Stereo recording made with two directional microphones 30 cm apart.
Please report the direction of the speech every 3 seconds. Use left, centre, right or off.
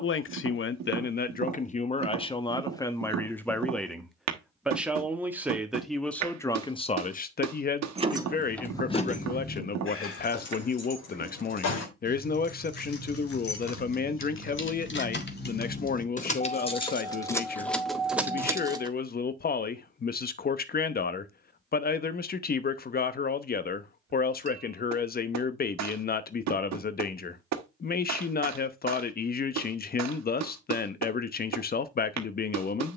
left, centre, left, left, left, left, left, left, left, left, left.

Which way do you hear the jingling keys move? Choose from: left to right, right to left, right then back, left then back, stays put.
left then back.